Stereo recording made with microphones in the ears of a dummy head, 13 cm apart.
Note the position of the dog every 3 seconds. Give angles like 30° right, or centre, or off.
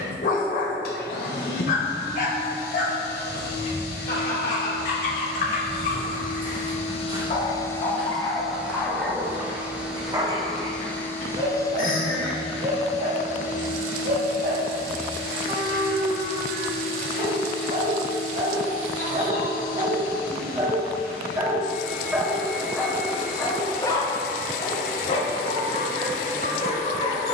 60° left, 60° left, 30° left, 30° right, 60° right, 60° right, 40° right, centre, 40° left.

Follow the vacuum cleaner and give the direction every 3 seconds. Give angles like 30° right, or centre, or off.
80° left, 80° left, 30° left, centre, 60° left, 70° left, 70° left, 70° left, 70° left.